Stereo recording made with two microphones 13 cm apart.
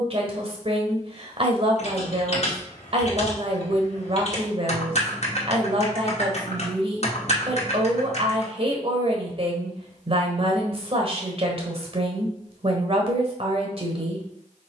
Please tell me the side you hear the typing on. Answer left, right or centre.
left.